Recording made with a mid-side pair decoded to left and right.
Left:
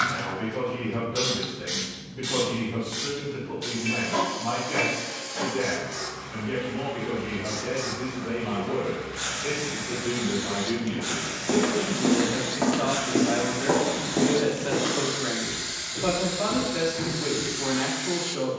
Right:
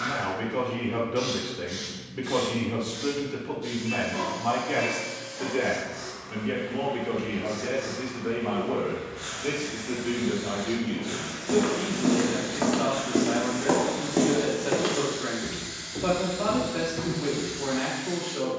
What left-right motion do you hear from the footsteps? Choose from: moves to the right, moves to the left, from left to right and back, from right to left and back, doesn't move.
moves to the right.